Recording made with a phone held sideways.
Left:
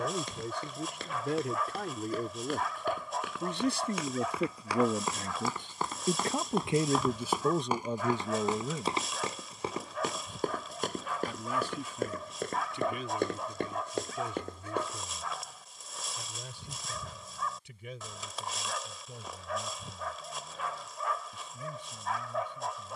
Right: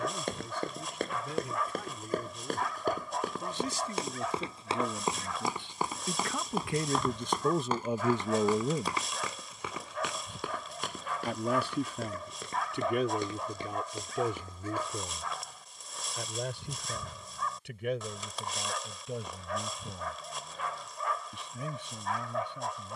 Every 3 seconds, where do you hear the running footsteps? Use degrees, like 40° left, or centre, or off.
50° right, 30° right, 10° left, 40° left, 60° left, off, off, off.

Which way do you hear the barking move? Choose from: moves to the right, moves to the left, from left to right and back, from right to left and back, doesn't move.
doesn't move.